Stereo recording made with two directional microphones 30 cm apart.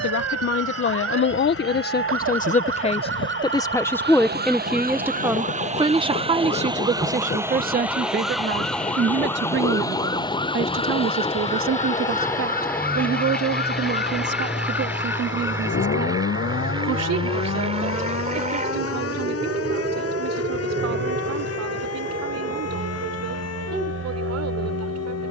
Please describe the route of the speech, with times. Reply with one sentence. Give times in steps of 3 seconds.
You can hear the speech on the left from 0 s, in the centre from 3 s and on the right from 6 s.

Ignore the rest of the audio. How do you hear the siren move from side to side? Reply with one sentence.
In this clip you hear the siren move from right to left.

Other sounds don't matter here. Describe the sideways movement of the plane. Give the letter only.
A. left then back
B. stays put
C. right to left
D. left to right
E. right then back
D.